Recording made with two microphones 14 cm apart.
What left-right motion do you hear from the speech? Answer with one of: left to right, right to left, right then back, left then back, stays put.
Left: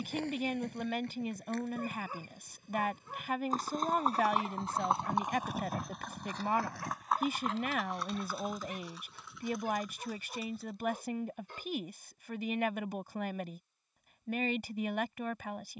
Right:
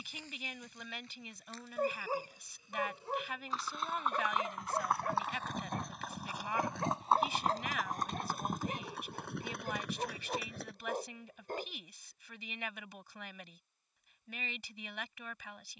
stays put.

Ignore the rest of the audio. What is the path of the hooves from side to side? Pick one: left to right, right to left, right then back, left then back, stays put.
left to right.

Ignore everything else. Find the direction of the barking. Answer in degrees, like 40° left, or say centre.
50° right.